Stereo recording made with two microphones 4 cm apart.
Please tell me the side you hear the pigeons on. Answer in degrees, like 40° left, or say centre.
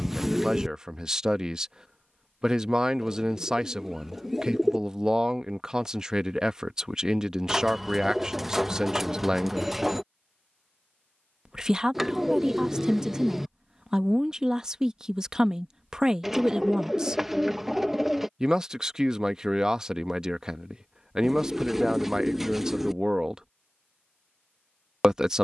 10° right.